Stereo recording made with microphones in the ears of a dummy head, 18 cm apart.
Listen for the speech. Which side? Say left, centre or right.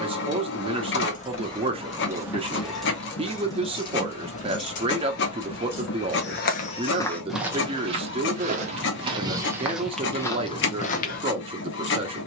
right.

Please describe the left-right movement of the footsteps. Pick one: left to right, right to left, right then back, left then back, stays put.
right then back.